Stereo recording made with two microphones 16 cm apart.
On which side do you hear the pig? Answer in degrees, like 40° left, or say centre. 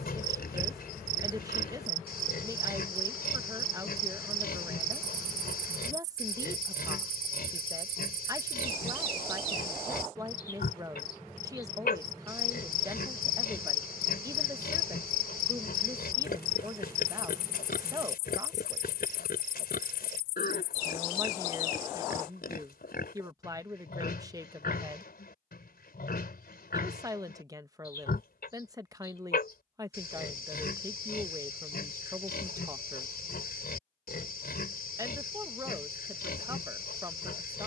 80° left.